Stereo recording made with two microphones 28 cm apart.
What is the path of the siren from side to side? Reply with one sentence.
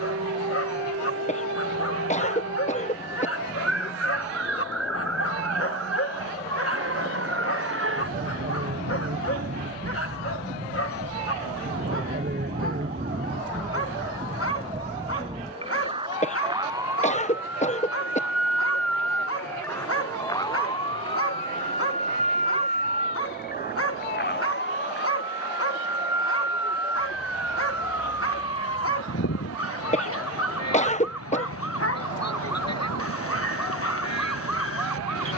You can hear the siren move to the left.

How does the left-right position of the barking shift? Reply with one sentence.
You can hear the barking stay in one place.